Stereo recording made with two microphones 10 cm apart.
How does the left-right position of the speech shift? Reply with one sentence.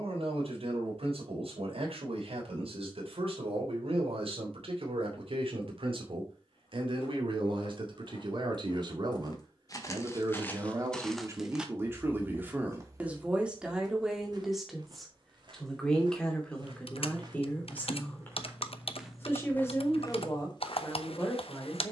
In this clip you hear the speech move from right to left.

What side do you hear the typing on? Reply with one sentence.
You can hear the typing on the left.